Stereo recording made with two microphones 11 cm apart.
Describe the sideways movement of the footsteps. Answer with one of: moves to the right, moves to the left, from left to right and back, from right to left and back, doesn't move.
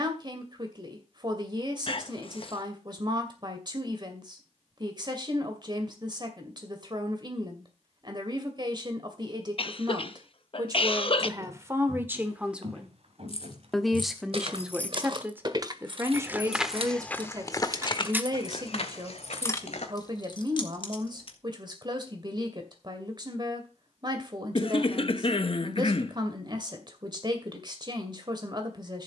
moves to the left.